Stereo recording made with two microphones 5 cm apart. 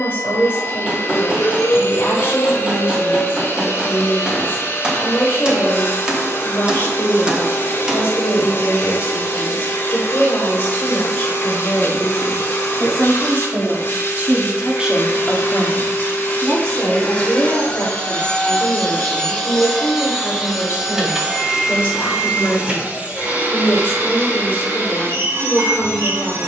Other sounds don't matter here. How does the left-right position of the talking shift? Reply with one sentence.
You can hear the talking move from left to right and back again.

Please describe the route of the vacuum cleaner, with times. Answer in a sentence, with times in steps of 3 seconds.
In this clip you hear the vacuum cleaner on the left from 0 s, in the centre from 18 s and on the right from 21 s.